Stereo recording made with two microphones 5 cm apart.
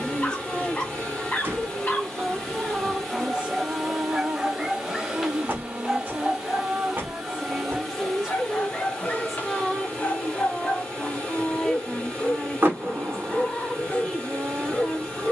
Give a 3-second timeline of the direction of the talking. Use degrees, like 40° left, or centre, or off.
10° left, 30° right, 20° right, 10° left, 10° left.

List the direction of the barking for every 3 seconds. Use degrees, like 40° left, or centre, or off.
40° left, centre, 20° left, 30° left, 30° left.